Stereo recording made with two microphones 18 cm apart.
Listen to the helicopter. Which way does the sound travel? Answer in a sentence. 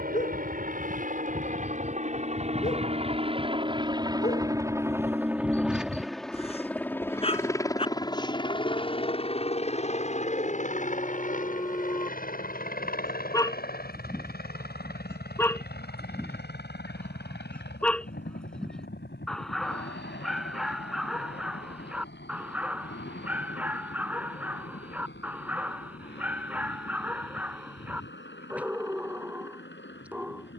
In this clip you hear the helicopter travel towards the left.